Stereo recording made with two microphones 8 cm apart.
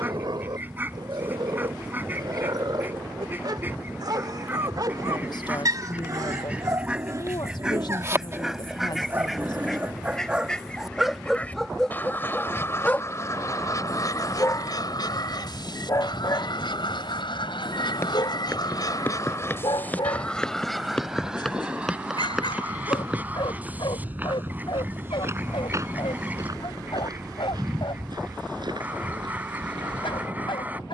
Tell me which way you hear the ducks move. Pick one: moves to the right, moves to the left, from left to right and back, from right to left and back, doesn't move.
from right to left and back.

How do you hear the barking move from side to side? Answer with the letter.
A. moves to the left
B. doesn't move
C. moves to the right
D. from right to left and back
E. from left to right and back
A.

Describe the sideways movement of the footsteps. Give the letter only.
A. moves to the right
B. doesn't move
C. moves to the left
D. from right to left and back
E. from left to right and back
A.